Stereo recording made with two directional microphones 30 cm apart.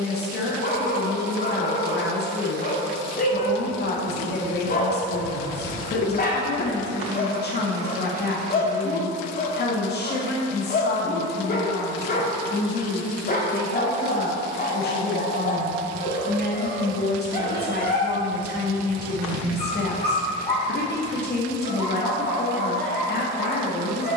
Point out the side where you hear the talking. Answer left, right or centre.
left.